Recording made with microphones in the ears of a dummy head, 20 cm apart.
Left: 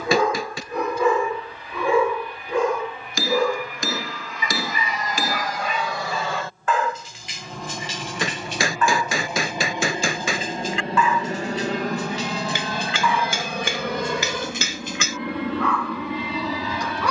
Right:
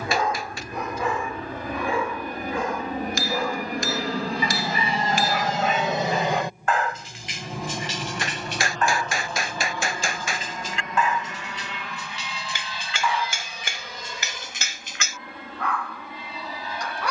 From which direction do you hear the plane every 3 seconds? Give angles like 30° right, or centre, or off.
50° right, 30° right, 10° right, 20° left, 50° left, 60° left.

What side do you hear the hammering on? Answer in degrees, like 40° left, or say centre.
70° left.